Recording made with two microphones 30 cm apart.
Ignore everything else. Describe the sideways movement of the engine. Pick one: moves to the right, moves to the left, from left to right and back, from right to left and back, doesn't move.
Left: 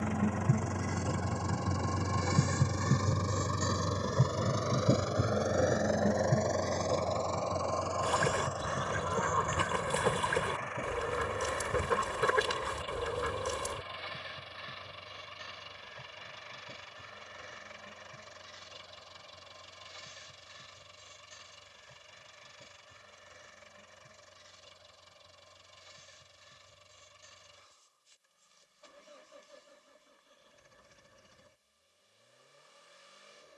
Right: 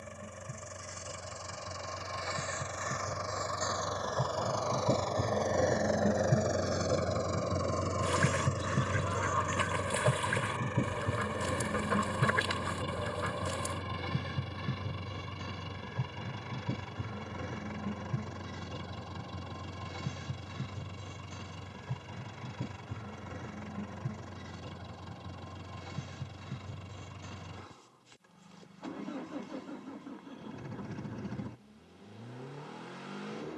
moves to the right.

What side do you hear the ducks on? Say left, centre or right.
left.